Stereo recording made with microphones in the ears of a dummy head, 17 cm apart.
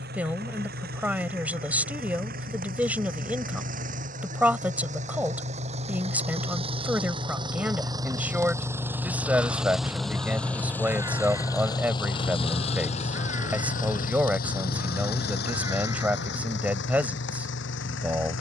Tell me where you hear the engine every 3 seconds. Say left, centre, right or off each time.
right, right, right, centre, left, left.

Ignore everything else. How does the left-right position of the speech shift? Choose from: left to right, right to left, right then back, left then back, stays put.
stays put.